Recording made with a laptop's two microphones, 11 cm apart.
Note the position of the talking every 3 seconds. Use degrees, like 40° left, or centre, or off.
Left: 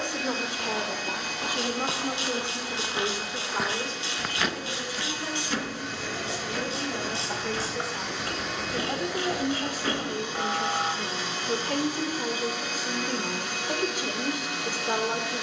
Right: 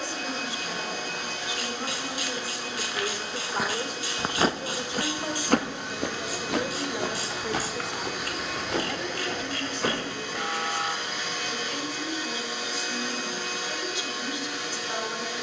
40° left, 20° right, 10° right, 40° left, 50° left.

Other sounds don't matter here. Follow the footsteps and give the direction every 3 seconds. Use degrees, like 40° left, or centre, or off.
50° left, 30° right, 70° right, 80° right, off.